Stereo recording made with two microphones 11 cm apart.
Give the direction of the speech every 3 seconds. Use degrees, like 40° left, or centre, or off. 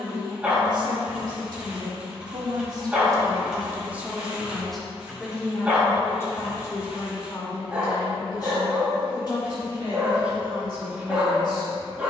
50° right, 10° right, 40° left, 50° left.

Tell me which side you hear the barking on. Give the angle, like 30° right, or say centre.
10° right.